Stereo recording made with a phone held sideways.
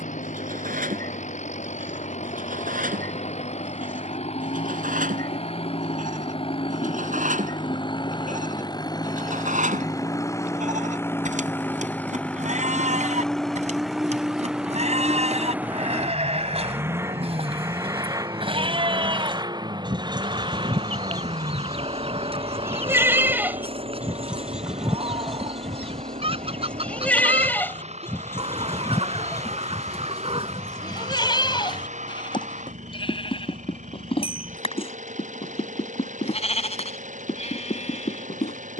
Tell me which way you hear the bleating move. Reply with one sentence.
In this clip you hear the bleating travel towards the left.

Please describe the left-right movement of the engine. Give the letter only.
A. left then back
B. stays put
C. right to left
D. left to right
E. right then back
D.